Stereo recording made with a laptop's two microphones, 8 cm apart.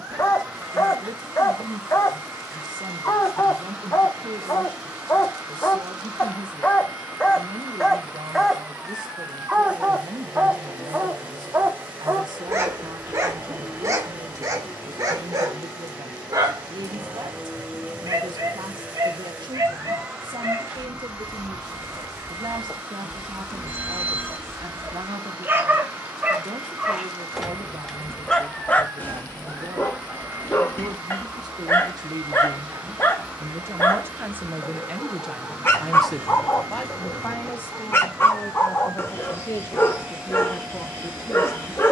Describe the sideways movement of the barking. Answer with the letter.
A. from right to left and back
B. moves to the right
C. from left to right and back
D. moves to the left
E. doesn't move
C.